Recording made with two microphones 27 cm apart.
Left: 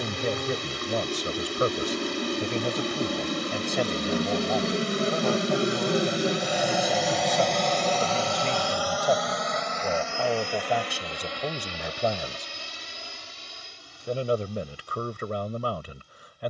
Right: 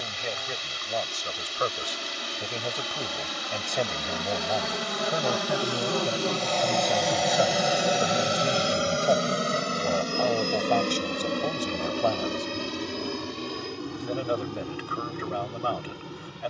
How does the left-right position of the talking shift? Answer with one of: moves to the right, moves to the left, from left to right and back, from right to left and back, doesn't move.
from left to right and back.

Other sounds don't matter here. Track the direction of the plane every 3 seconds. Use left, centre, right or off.
left, left, centre, right, right, right.